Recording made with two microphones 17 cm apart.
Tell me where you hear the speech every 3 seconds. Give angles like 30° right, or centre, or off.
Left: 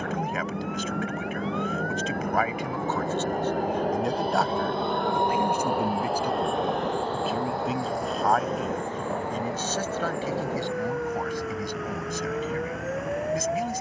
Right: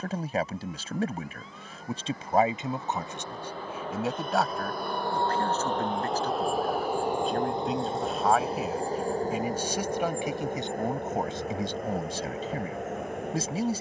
30° right, centre, centre, 20° right, 30° right.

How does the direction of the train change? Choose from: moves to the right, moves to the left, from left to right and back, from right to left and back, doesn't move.
moves to the right.